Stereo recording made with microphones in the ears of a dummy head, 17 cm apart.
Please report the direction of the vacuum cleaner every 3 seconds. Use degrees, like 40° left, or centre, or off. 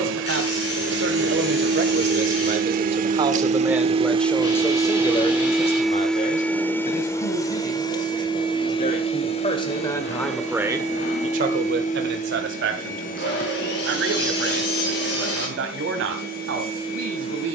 60° right, 20° right, 20° left, 40° left, 50° left, 50° left.